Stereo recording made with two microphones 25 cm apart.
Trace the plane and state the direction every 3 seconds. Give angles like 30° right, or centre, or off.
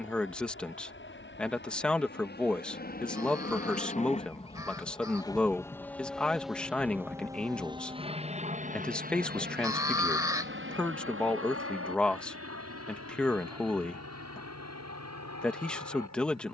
50° left, 20° left, 10° right, 40° right, 60° right, 70° right.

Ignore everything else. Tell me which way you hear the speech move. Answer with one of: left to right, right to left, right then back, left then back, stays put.
stays put.